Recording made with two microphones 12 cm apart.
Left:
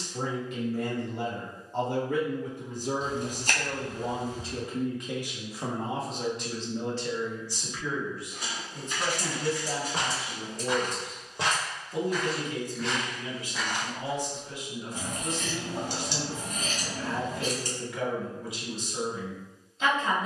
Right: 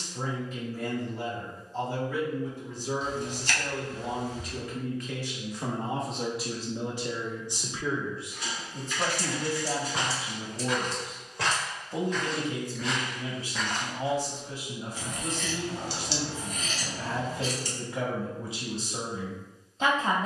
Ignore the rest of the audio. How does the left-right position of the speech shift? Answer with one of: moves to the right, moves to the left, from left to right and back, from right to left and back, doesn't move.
moves to the right.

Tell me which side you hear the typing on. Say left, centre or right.
left.